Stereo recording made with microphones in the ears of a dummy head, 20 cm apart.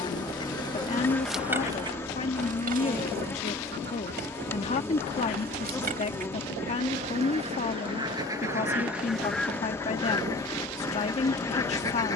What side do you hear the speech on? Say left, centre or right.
left.